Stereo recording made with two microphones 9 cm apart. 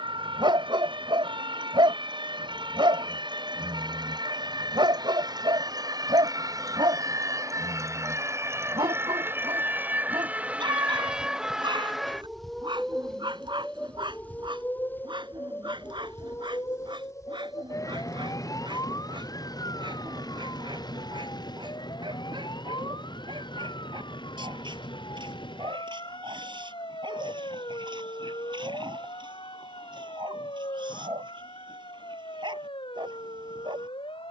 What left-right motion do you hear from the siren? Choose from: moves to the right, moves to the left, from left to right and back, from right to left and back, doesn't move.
moves to the left.